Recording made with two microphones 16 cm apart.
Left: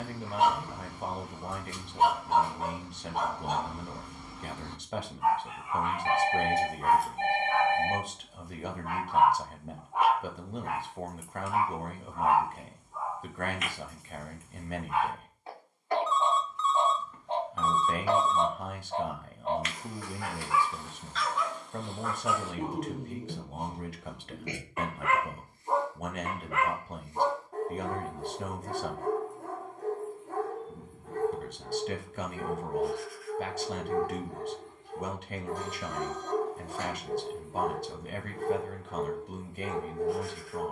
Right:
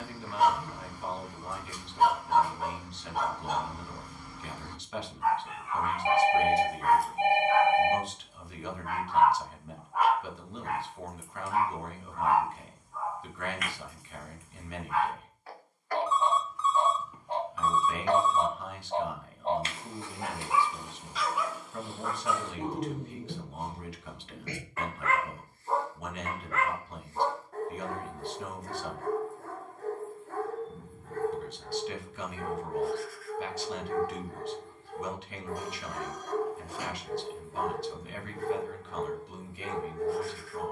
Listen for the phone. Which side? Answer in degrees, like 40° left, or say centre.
10° right.